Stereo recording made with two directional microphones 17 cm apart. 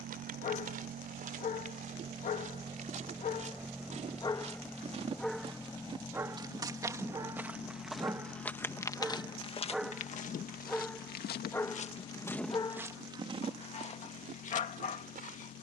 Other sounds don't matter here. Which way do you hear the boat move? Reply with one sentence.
In this clip you hear the boat go from the right side to the left.